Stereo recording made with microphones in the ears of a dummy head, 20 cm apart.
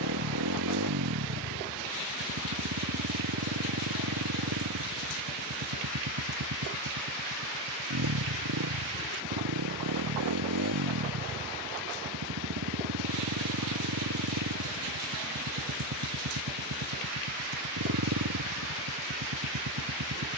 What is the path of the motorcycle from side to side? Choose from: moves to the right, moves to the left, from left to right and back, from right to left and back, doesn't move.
doesn't move.